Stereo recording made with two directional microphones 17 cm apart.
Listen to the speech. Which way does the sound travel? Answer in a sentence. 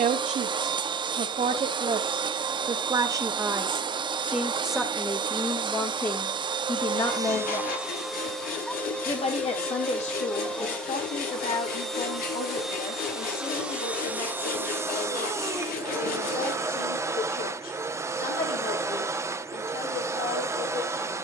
In this clip you hear the speech travel towards the left.